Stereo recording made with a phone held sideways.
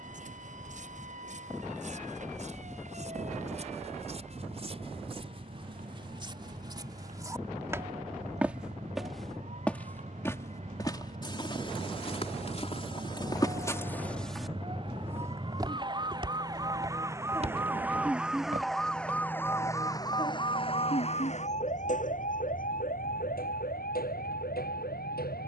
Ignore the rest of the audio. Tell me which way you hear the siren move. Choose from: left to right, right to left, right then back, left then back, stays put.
right to left.